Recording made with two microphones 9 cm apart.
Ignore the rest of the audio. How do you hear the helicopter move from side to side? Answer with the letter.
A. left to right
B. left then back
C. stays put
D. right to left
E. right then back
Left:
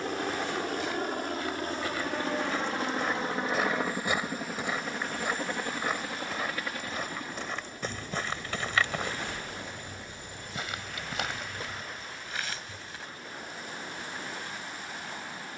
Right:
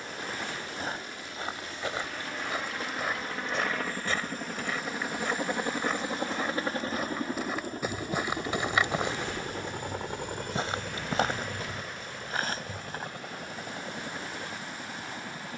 A.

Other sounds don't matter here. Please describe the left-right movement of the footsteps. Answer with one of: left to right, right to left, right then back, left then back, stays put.
left then back.